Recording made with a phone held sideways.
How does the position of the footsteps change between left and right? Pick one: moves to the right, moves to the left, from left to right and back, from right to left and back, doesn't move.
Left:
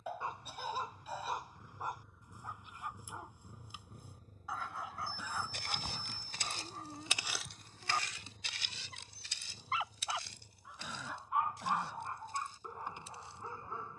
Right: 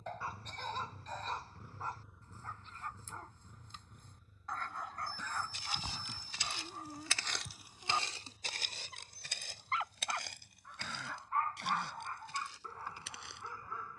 moves to the right.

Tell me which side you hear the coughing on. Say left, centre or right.
centre.